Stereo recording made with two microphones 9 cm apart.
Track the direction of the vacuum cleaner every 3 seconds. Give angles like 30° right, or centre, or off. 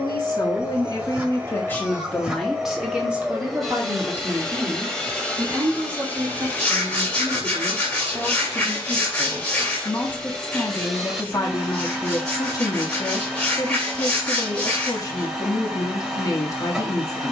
10° right, 10° left, 20° left, centre, 10° right, 10° right.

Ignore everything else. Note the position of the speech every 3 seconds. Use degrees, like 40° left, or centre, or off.
20° left, 30° right, 20° right, 20° left, 40° left, 40° left.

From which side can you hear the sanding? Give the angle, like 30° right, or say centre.
10° left.